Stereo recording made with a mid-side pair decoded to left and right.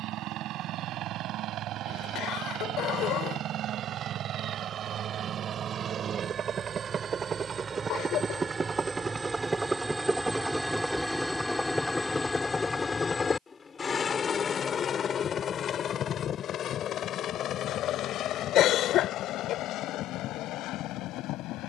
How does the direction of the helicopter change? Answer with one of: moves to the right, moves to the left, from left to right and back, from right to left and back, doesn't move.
moves to the left.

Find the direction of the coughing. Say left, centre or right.
left.